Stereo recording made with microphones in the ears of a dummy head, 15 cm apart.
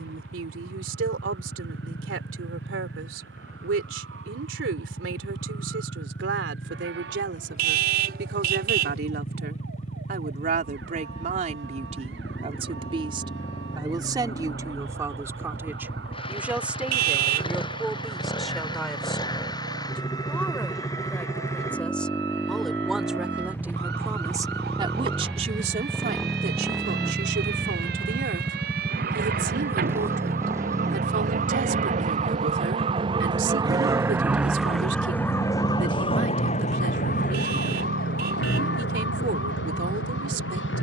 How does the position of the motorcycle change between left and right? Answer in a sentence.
In this clip you hear the motorcycle travel towards the right.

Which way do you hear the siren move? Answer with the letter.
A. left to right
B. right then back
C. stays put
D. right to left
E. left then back
D.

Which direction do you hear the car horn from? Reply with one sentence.
In this clip you hear the car horn on the right.